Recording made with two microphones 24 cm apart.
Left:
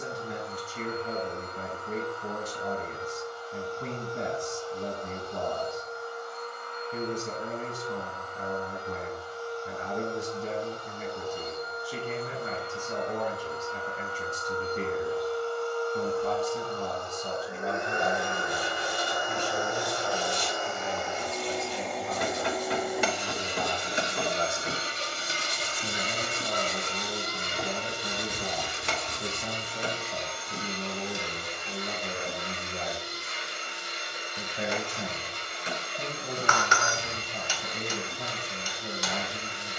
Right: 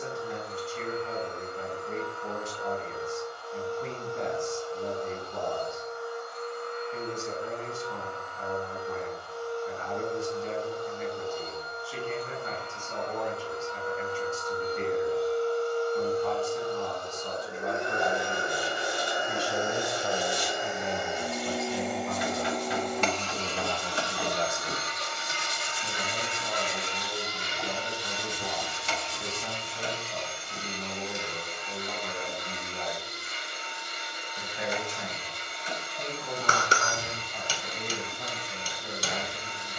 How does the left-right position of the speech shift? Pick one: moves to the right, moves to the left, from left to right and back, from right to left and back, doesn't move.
from left to right and back.